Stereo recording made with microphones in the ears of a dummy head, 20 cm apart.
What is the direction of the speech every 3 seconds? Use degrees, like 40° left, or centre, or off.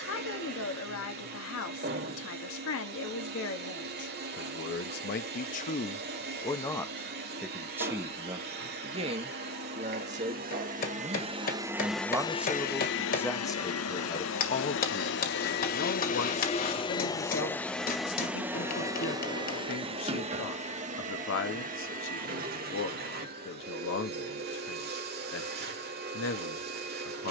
70° left, 50° left, 10° right, 30° right, 10° left, 60° left, 60° left, 60° left, 60° left.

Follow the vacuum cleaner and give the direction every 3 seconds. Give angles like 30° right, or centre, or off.
50° right, 50° right, 50° right, 40° right, 50° left, 30° left, 20° right, 40° right, 50° right.